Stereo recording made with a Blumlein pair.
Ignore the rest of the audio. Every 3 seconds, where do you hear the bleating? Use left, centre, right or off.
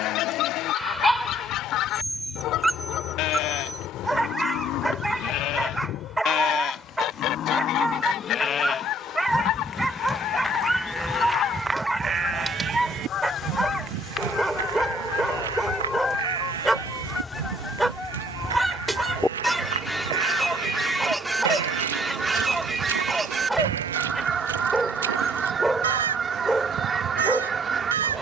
left, left, left, centre, right, right, right, right, right, right.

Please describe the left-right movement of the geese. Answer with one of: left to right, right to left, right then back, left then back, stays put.
left to right.